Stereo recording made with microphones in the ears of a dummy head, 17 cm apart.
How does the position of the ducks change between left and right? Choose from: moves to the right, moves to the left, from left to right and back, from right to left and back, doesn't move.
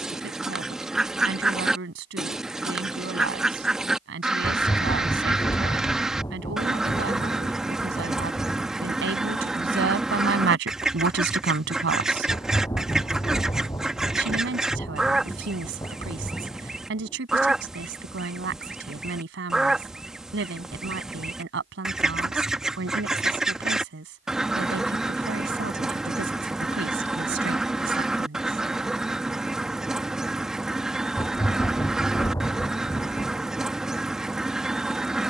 doesn't move.